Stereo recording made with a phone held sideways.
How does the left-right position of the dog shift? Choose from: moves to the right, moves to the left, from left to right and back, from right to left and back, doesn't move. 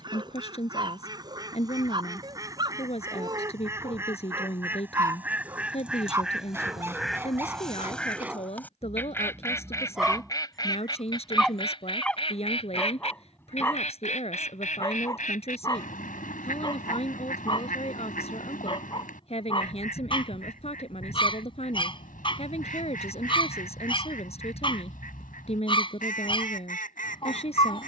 moves to the left.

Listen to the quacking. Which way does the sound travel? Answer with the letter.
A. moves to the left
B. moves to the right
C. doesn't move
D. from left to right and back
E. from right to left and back
A.